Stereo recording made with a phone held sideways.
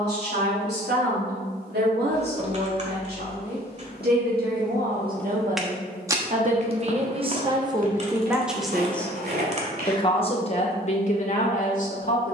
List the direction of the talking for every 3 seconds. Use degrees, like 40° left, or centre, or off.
80° right, 60° right, 20° right, 40° left.